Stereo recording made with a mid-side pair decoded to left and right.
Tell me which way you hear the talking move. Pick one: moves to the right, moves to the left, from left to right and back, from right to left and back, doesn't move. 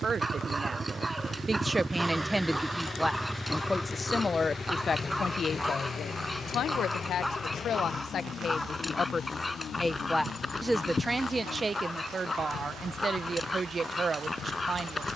from right to left and back.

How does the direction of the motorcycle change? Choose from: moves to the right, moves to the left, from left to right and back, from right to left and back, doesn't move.
moves to the left.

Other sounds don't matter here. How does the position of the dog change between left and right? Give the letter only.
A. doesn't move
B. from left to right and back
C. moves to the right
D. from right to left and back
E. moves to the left
E.